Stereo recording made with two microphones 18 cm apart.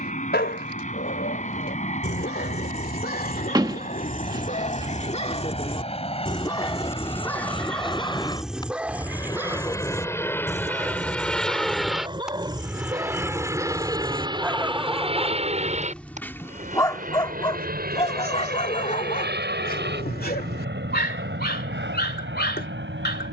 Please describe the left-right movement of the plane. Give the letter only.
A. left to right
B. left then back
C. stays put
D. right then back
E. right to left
A.